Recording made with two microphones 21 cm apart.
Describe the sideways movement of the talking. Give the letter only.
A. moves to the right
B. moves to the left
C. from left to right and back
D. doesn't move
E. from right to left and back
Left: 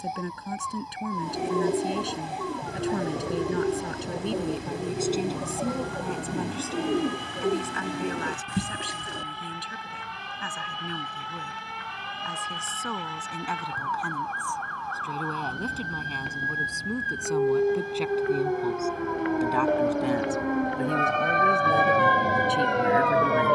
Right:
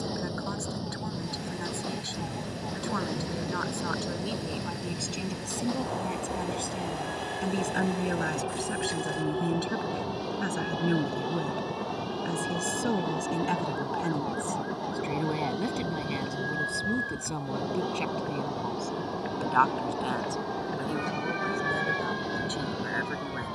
C.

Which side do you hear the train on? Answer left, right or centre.
right.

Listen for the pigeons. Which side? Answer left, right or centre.
left.